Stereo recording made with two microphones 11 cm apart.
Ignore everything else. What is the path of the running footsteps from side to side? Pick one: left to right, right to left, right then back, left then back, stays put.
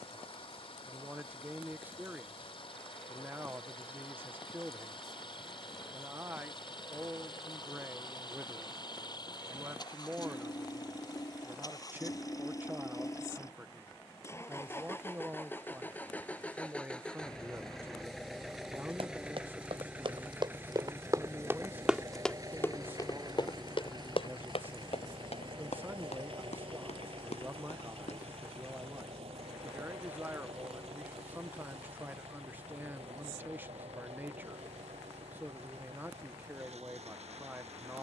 right to left.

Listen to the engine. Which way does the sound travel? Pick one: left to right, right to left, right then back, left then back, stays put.
left to right.